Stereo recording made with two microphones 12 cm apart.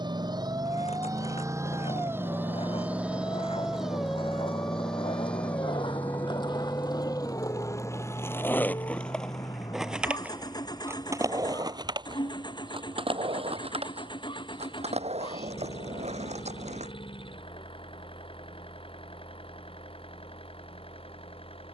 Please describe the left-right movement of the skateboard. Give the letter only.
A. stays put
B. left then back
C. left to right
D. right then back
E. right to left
C.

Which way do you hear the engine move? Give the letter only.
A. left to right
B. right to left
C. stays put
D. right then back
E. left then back
B.